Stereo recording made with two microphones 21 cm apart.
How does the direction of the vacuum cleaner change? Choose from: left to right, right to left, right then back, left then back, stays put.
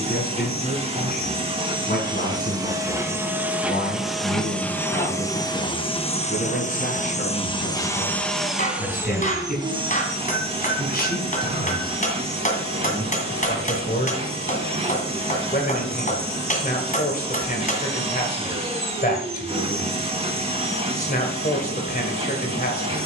left then back.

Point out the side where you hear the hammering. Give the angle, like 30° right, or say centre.
40° left.